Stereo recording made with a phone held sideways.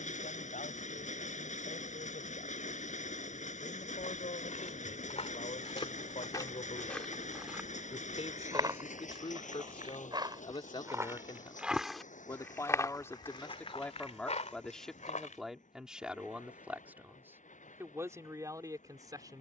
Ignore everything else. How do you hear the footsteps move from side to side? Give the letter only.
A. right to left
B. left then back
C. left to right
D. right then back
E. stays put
D.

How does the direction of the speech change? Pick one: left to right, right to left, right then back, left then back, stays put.
left to right.